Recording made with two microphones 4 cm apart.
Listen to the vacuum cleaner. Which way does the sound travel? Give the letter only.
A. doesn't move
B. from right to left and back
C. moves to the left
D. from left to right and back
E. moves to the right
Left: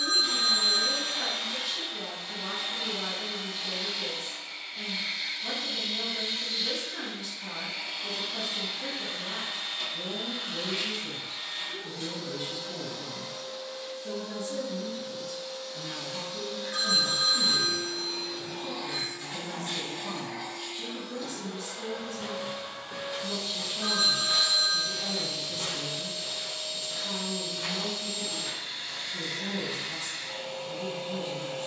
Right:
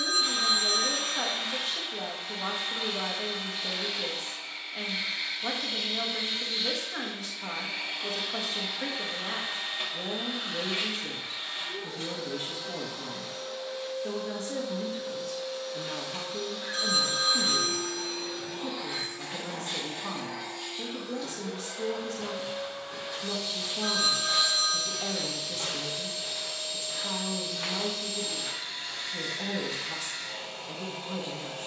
C.